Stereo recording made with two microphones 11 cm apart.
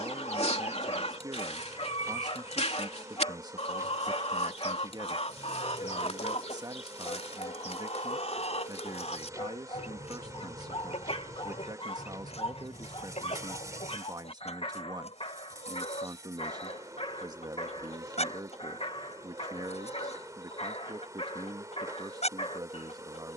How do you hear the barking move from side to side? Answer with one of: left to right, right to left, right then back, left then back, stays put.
stays put.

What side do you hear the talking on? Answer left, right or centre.
right.